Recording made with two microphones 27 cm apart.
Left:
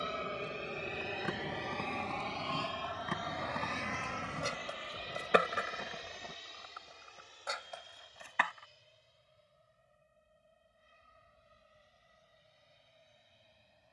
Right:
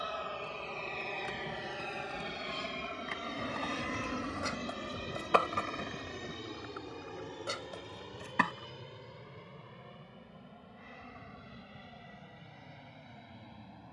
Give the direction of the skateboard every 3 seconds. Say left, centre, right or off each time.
left, left, right, off, off.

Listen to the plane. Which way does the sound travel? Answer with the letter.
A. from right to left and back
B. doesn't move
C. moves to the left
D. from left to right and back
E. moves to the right
E.